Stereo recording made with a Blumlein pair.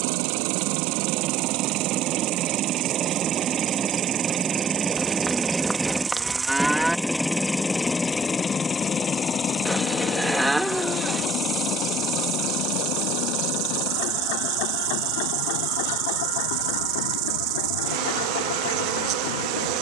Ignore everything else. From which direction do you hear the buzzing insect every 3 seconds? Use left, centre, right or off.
right, right, centre, centre, right, right, right.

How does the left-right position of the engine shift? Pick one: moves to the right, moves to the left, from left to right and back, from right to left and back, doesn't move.
moves to the left.